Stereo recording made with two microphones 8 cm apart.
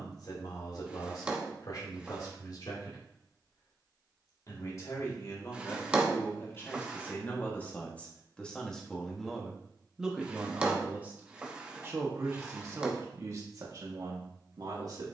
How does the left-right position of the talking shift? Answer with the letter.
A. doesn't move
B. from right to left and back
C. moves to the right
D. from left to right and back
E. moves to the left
C.